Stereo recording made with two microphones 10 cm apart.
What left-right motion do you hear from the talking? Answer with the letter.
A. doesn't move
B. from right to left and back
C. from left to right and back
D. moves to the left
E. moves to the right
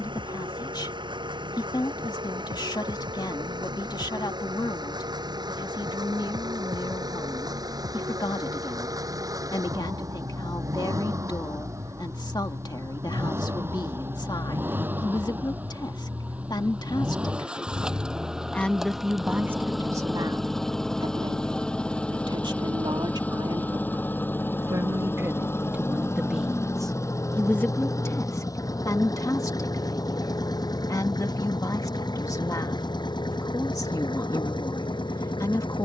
C.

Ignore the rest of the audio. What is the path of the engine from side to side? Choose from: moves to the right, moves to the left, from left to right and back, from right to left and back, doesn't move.
moves to the left.